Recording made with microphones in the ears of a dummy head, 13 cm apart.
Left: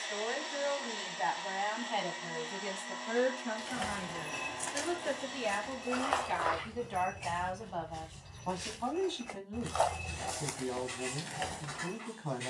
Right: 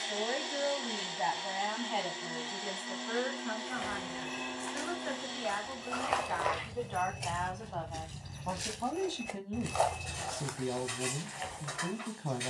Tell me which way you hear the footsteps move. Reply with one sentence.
You can hear the footsteps move from left to right and back again.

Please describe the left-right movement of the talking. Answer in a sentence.
You can hear the talking go left and come back.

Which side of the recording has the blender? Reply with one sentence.
You can hear the blender on the right.